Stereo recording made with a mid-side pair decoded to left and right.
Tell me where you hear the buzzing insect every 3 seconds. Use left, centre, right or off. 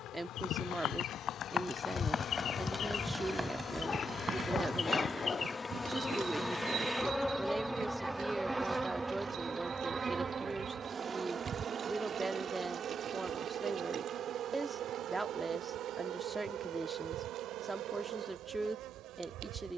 left, left, centre, right, right, right, right.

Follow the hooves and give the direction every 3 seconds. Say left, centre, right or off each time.
left, right, right, right, off, off, off.